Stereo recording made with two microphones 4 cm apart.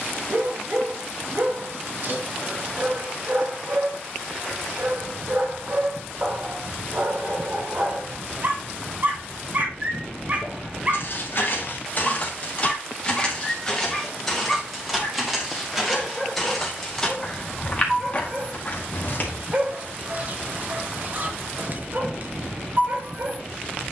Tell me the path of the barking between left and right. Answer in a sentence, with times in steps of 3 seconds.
In this clip you hear the barking on the right from 0 s, in the centre from 12 s and on the right from 18 s.